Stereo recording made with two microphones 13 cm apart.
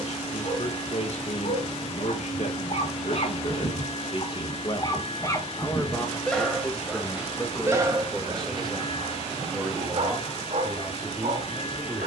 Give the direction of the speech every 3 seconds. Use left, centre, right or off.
left, left, centre, centre.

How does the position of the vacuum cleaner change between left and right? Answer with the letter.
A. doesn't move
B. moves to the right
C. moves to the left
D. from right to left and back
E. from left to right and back
A.